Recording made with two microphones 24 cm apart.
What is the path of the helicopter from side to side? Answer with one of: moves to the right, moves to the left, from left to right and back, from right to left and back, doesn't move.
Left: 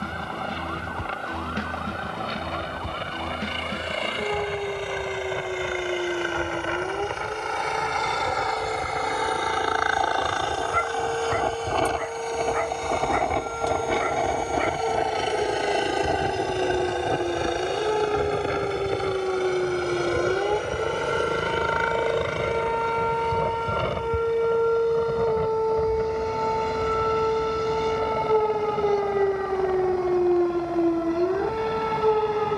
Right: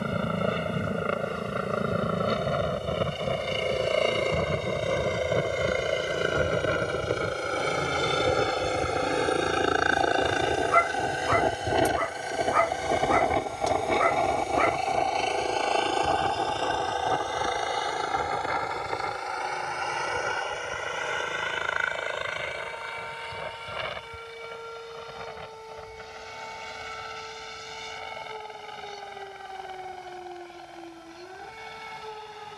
moves to the left.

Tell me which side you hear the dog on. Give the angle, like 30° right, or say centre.
80° right.